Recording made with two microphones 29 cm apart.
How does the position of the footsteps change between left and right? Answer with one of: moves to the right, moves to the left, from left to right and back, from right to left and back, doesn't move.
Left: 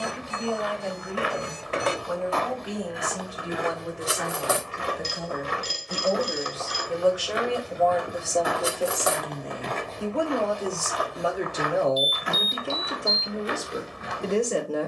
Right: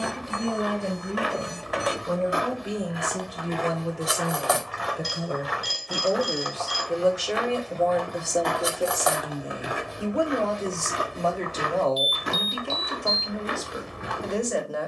from right to left and back.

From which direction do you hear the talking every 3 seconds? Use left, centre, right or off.
right, right, right, centre, left.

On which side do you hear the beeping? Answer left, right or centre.
left.